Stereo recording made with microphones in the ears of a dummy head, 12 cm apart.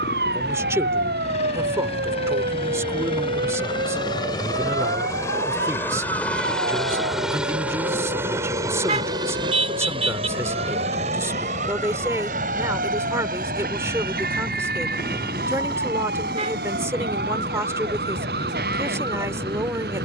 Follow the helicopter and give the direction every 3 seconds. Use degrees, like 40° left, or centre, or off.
50° left, 30° left, 10° right, 40° right, 60° right, 70° right, 80° right.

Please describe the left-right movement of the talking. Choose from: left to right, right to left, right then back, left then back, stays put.
stays put.